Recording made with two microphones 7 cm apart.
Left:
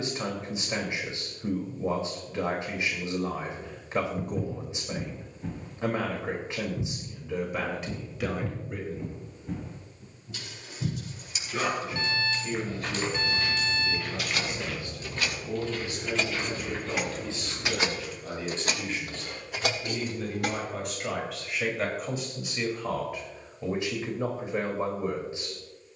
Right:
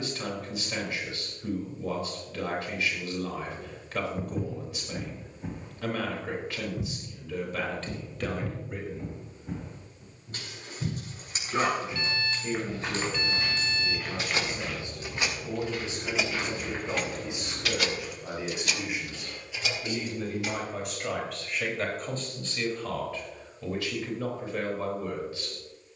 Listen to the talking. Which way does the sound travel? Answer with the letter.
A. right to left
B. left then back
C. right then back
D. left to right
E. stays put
C.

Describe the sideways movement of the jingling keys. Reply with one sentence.
You can hear the jingling keys move from right to left.